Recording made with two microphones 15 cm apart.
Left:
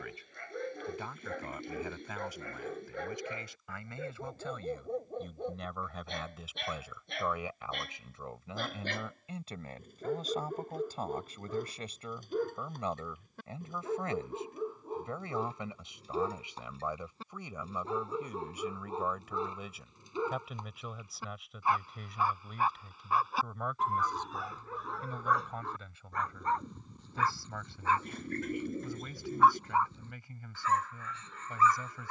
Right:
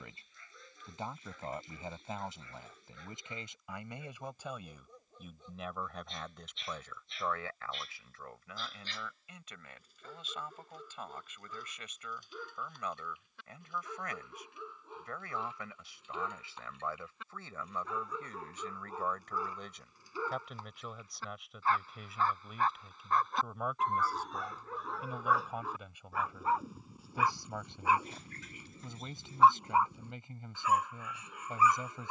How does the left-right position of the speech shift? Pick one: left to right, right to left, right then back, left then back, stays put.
left then back.